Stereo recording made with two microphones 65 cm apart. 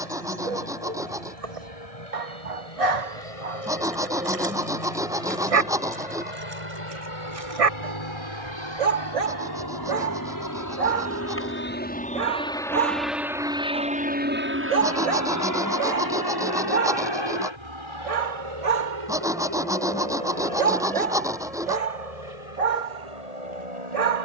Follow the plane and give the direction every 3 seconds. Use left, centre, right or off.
left, left, left, left, centre, right, right, right.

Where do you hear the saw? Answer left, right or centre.
centre.